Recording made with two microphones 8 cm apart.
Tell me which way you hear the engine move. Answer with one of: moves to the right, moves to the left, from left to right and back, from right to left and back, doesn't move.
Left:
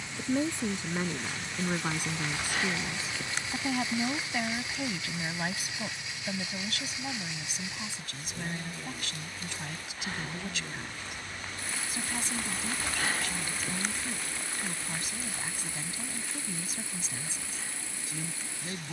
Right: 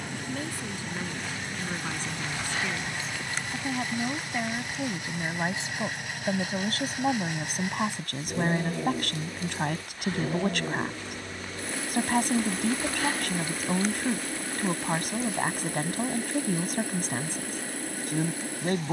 doesn't move.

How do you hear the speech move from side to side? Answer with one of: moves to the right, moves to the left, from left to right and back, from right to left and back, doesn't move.
moves to the right.